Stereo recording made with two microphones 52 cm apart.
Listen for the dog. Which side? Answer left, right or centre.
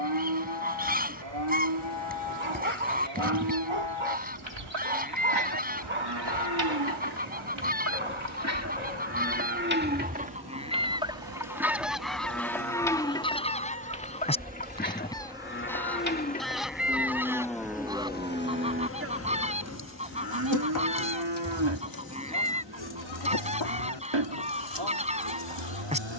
right.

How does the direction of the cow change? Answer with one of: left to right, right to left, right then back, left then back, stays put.
left then back.